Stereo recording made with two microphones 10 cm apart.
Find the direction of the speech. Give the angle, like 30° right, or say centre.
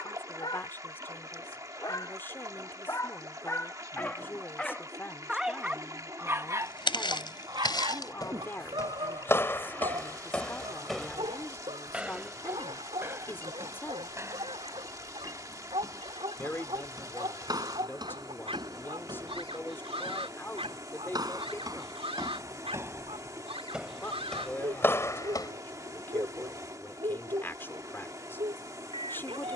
20° left.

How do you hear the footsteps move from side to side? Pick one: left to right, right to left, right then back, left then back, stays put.
right then back.